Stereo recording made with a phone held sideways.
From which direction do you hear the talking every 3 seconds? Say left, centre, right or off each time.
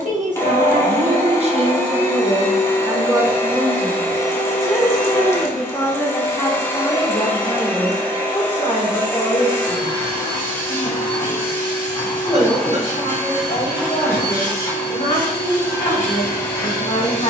right, centre, left, left, left, left.